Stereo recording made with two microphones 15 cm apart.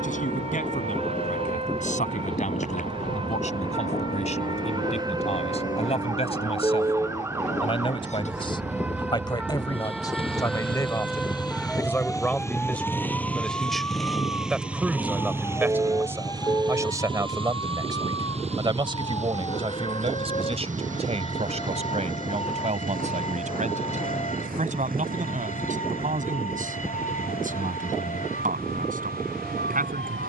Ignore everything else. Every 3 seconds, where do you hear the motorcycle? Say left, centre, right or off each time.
left, left, left, left, centre, right, right, right, right, right.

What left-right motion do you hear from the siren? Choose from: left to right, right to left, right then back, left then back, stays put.
right to left.